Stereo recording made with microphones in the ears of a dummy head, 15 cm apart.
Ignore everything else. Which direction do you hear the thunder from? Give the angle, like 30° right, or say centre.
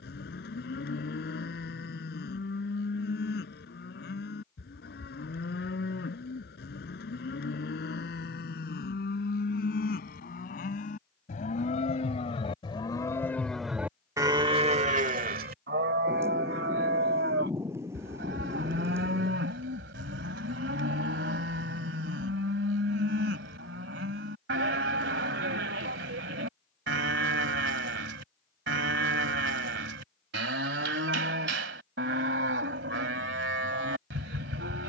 20° right.